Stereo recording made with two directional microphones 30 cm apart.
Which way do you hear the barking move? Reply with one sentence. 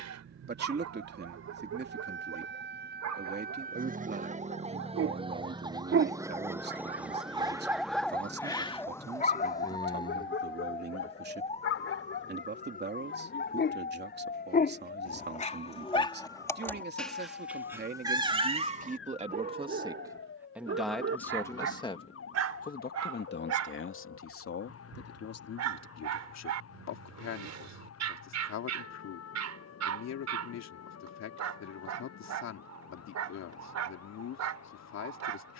You can hear the barking move from right to left and back again.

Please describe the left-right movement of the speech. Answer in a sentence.
In this clip you hear the speech move to the left.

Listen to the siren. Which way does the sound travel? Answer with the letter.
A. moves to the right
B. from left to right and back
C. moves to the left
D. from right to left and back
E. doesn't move
C.